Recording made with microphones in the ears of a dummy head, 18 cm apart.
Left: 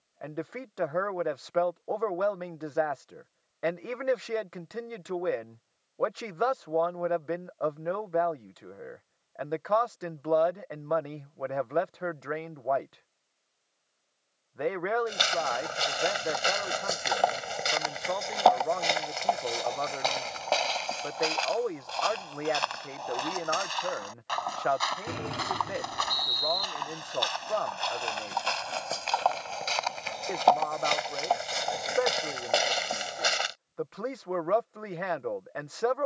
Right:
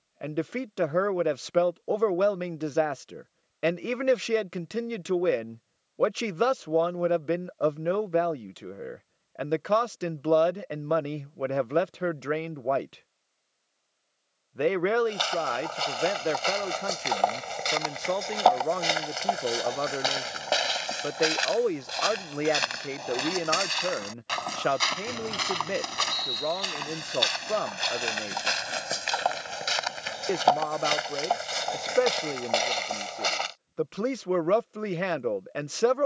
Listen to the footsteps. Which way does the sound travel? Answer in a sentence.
In this clip you hear the footsteps go right and come back.